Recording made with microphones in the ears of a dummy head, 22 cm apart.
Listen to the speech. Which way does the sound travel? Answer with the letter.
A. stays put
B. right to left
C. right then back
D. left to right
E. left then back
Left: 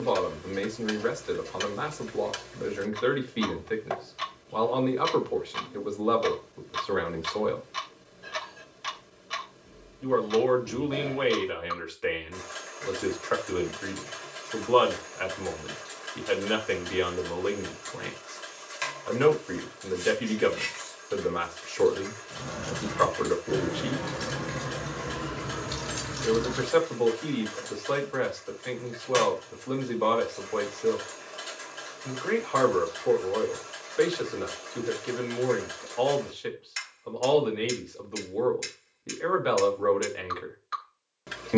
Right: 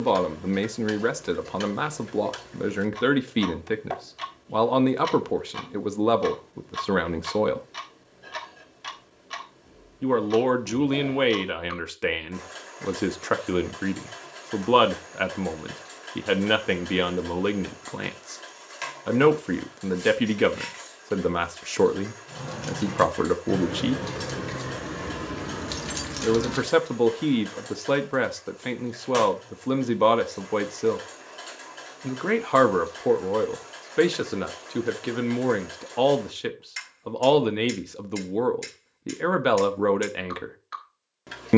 A.